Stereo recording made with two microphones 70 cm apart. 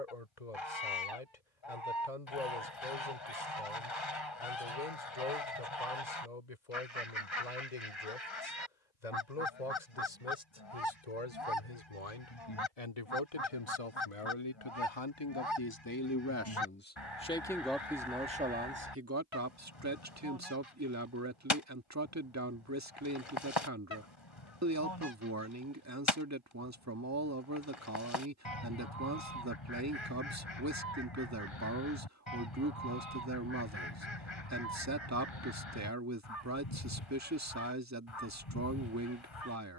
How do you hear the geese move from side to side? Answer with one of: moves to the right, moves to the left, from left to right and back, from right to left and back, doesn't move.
doesn't move.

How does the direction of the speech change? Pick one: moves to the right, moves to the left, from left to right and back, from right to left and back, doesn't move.
moves to the right.